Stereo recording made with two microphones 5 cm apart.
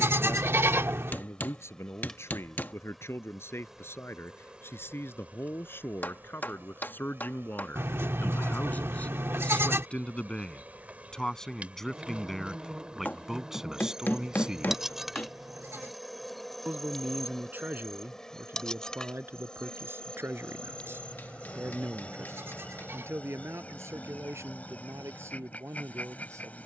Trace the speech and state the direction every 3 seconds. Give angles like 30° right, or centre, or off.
60° left, 50° left, 40° left, 20° left, 10° right, 40° right, 50° right, 60° right, 60° right.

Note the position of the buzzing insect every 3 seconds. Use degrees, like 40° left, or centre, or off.
10° left, 20° right, 40° right, 30° right, 10° right, centre, 20° left, 30° left, 30° left.